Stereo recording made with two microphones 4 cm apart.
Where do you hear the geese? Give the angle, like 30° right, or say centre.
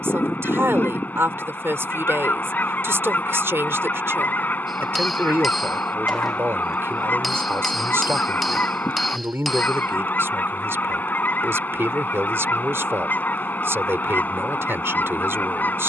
50° left.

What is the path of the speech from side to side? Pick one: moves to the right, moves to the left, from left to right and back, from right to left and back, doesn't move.
doesn't move.